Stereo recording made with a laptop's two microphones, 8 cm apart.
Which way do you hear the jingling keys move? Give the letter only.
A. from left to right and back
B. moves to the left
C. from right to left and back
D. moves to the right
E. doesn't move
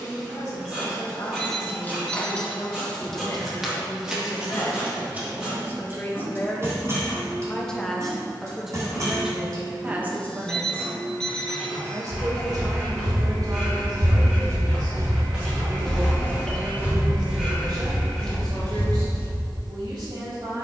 D.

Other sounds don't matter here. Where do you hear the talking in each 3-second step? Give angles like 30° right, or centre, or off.
50° left, 40° left, 10° left, 20° right, 50° right, 70° right, 70° right.